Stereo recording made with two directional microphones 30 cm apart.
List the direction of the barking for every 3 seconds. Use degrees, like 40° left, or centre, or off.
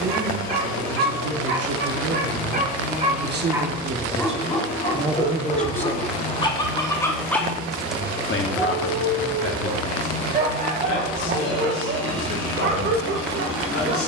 40° right, 10° left, centre, 30° right, 40° right.